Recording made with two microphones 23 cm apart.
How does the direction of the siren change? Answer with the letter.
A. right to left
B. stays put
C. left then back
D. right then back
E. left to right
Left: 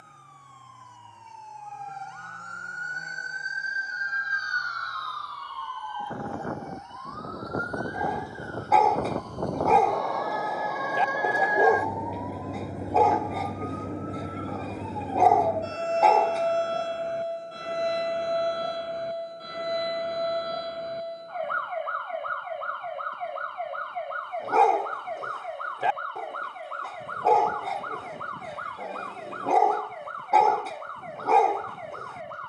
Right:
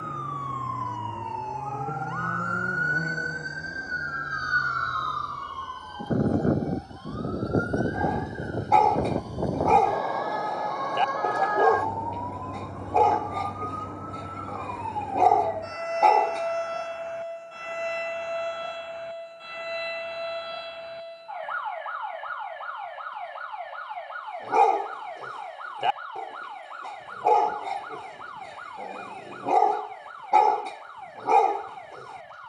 A.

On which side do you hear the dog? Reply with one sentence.
In this clip you hear the dog in the centre.